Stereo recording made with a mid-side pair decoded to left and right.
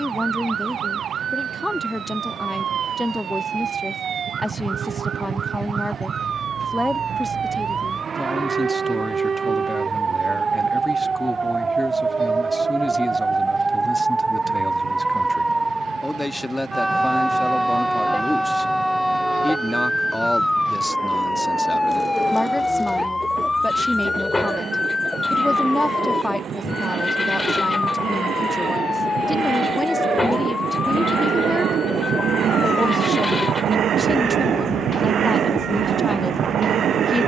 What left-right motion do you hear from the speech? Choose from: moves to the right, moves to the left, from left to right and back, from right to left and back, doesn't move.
doesn't move.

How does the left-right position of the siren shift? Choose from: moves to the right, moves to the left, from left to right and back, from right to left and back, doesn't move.
moves to the left.